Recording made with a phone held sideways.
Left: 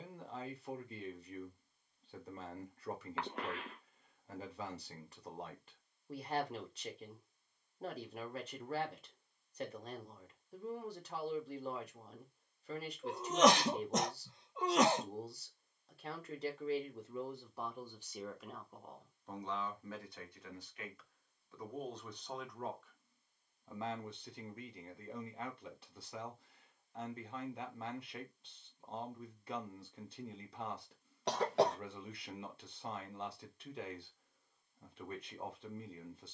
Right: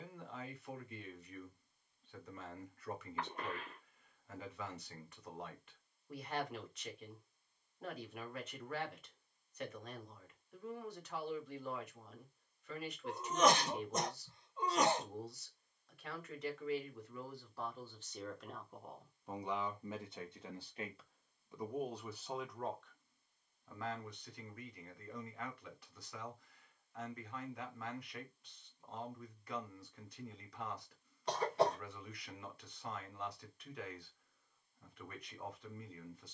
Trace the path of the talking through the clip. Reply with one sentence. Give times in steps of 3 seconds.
You can hear the talking on the left from 0 s, in the centre from 18 s and on the left from 24 s.